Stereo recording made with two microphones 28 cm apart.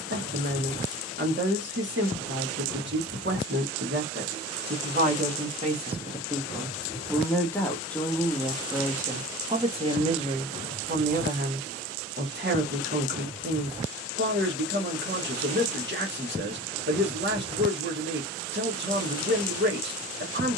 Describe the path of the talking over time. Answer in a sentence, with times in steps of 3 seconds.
In this clip you hear the talking on the right from 0 s, in the centre from 6 s and on the right from 9 s.